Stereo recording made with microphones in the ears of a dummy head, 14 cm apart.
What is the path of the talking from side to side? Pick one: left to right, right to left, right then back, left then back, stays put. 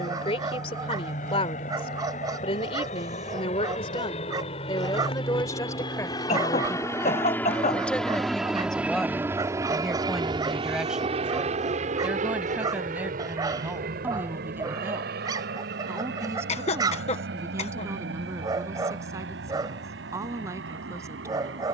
left to right.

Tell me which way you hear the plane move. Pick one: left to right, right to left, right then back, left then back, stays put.
left to right.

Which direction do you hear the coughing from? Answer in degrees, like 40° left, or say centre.
40° left.